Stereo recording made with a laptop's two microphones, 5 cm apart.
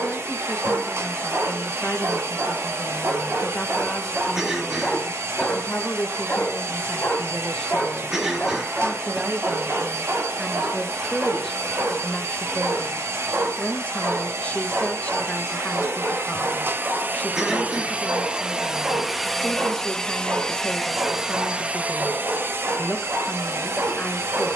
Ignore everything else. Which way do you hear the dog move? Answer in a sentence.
In this clip you hear the dog move from right to left and back again.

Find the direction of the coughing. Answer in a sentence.
You can hear the coughing in the centre.